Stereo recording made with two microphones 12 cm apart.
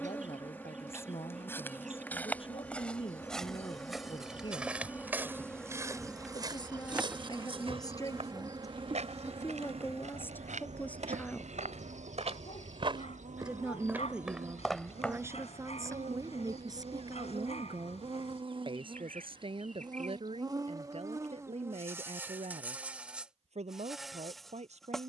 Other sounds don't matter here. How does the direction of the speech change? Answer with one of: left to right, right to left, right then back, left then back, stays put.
left to right.